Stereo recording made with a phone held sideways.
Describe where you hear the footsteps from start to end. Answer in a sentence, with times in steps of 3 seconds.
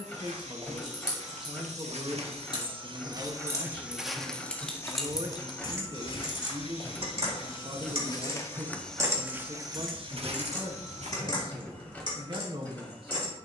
In this clip you hear the footsteps on the right from 0 s, in the centre from 3 s, on the left from 6 s, on the right from 9 s and not at all from 12 s.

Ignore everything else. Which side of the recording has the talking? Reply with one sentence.
You can hear the talking on the right.